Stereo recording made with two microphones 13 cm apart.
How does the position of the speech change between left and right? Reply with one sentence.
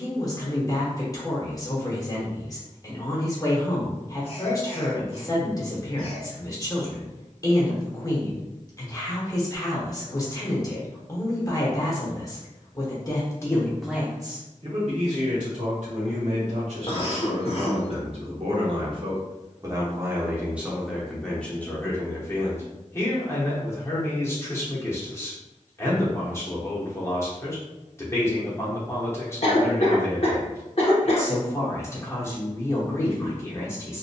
In this clip you hear the speech move from left to right and back again.